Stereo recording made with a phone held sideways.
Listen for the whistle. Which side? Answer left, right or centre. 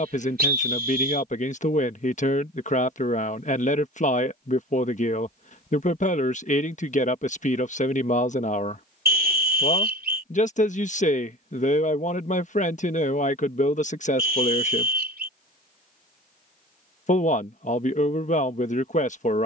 right.